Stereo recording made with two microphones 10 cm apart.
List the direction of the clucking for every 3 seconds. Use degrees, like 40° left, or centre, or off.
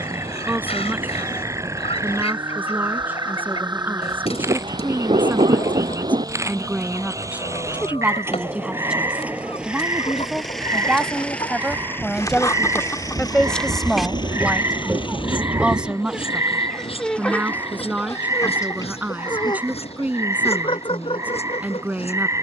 80° left, 80° left, 80° left, 60° left, 20° left, 10° left, 50° left, 70° left.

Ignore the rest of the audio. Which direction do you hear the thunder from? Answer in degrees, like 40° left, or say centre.
70° right.